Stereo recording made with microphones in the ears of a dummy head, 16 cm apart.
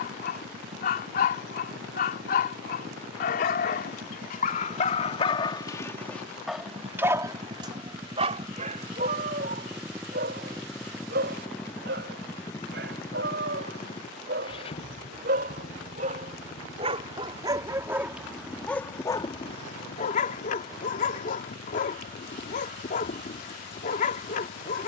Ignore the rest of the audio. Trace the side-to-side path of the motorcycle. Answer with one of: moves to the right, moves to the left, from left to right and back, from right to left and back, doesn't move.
moves to the left.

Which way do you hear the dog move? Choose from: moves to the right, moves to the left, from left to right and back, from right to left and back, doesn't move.
from left to right and back.